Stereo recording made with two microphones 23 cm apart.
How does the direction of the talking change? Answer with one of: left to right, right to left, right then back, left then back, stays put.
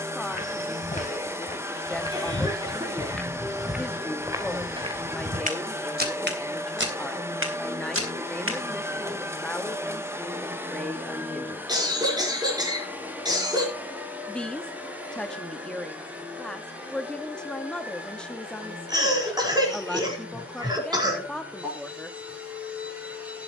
stays put.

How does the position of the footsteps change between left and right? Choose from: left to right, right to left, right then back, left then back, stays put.
left to right.